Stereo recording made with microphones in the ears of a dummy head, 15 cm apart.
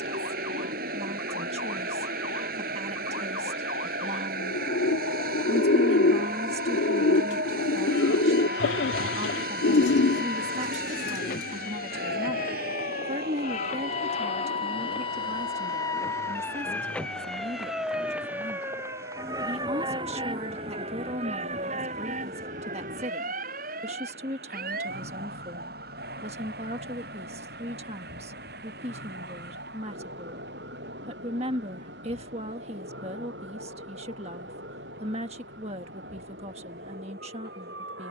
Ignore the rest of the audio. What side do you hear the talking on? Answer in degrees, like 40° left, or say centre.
40° right.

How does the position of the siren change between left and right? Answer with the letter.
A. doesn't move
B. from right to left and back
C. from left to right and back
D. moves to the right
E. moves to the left
D.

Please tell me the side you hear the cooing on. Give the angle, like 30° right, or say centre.
70° left.